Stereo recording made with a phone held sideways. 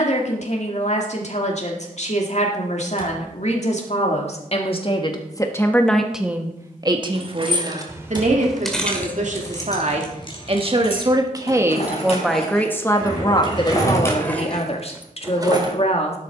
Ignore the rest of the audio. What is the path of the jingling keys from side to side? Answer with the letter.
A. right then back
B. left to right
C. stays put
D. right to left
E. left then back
E.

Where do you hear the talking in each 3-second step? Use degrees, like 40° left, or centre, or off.
50° left, 40° left, 40° right, 40° right, 30° left, 50° left.